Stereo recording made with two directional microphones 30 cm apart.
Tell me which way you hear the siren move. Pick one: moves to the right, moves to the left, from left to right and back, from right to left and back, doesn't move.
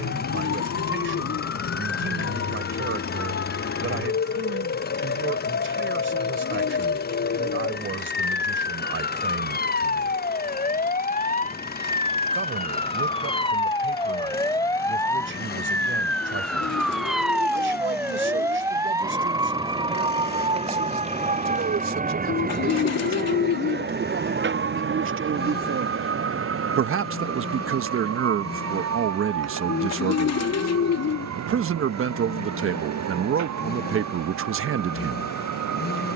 moves to the right.